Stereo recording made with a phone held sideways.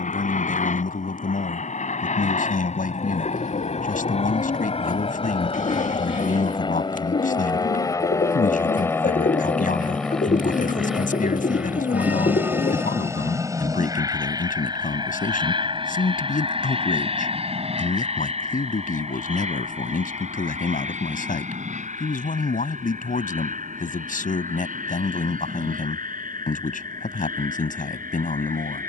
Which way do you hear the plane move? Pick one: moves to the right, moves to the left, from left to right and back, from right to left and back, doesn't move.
moves to the right.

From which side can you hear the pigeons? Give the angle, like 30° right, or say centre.
60° left.